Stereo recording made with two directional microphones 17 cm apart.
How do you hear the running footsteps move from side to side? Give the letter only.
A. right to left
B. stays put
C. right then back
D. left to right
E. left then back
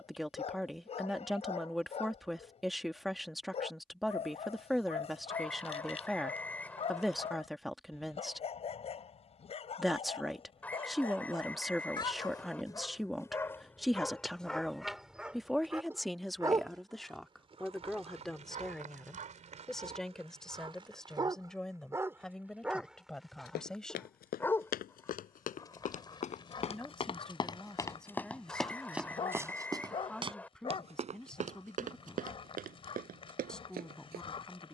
D.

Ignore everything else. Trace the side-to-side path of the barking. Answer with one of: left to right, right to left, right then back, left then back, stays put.
right then back.